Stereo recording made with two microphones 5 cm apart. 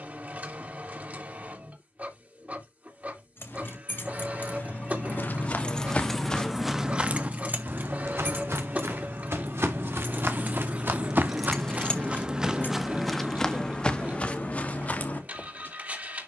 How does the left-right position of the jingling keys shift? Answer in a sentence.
In this clip you hear the jingling keys go right and come back.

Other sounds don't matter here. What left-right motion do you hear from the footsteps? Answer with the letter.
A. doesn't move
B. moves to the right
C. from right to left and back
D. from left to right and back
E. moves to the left
D.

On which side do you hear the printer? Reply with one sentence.
You can hear the printer on the right.